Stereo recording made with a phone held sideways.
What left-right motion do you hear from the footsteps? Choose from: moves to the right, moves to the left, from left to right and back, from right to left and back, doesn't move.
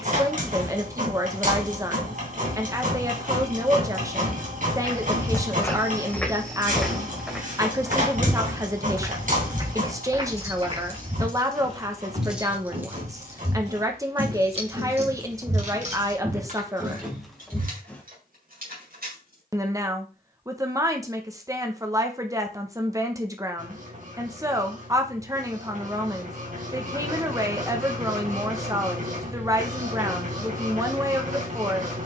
from left to right and back.